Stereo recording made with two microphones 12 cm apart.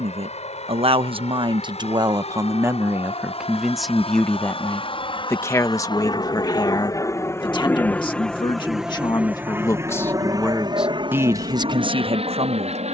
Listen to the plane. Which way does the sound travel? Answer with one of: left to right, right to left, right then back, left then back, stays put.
left to right.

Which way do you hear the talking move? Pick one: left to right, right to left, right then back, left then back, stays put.
left then back.